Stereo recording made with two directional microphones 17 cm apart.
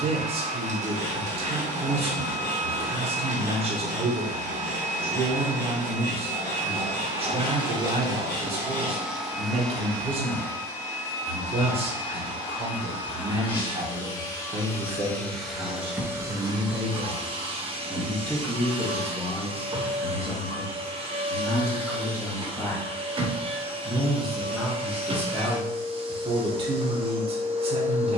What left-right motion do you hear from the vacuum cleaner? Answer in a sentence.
In this clip you hear the vacuum cleaner go left and come back.